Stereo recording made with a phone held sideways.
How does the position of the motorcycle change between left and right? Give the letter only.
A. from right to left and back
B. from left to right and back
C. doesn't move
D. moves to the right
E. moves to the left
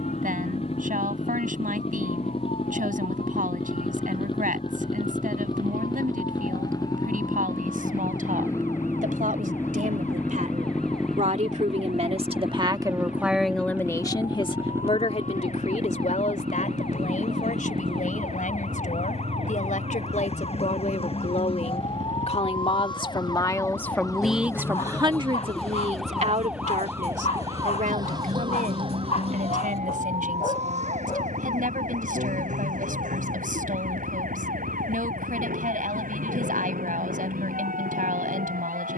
D.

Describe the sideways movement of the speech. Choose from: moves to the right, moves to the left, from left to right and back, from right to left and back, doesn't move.
from right to left and back.